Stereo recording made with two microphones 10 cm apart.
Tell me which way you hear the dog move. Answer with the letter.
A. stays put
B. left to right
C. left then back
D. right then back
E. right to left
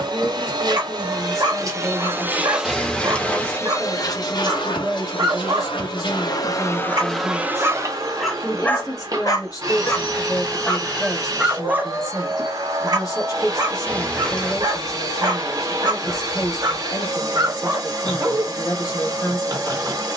C.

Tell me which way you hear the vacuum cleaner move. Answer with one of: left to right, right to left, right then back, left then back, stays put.
left then back.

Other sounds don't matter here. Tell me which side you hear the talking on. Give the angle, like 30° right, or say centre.
40° left.